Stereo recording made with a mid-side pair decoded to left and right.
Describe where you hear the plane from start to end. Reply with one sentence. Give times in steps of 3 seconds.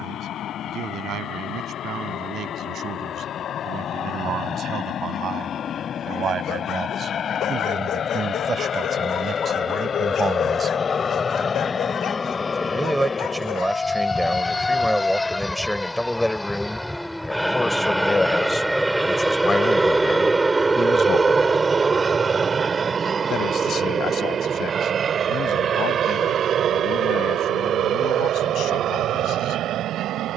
In this clip you hear the plane on the left from 0 s, in the centre from 15 s and on the right from 21 s.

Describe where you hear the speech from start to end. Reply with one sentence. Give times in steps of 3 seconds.
You can hear the speech on the right from 0 s, in the centre from 12 s and on the left from 18 s.